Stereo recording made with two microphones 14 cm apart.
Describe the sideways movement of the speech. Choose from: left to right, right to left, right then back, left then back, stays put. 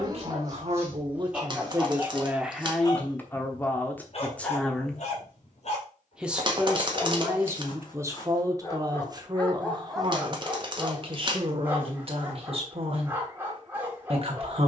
left then back.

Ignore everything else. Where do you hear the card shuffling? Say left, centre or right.
right.